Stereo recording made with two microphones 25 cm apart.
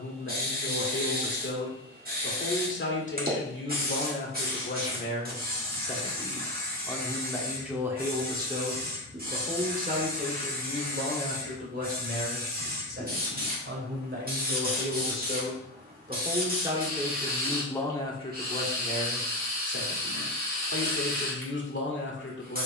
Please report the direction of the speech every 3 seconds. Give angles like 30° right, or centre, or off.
50° left, 40° left, centre, 40° right, 50° right, 20° right, 40° left, 50° left.